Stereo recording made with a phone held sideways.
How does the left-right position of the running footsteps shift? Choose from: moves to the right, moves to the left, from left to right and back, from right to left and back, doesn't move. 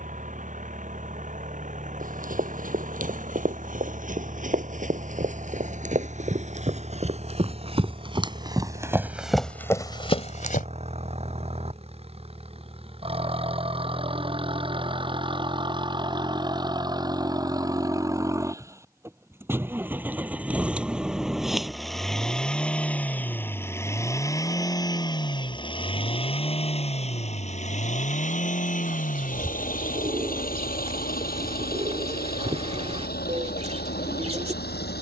moves to the left.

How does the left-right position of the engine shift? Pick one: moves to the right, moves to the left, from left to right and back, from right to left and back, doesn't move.
moves to the left.